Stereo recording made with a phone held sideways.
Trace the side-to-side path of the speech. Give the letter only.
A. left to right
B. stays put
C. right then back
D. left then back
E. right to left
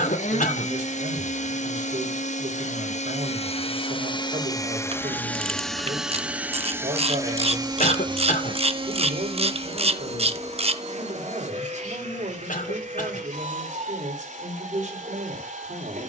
B.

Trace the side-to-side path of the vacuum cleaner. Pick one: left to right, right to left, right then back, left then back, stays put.
left to right.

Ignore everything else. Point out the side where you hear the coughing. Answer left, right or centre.
left.